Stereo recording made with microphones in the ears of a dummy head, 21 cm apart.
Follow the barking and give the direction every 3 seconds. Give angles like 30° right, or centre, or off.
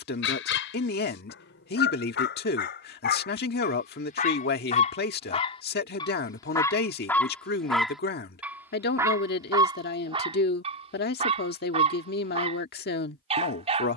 50° left, 40° left, 10° left, 30° right, 30° right.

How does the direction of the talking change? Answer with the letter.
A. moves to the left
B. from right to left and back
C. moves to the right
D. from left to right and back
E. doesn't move
E.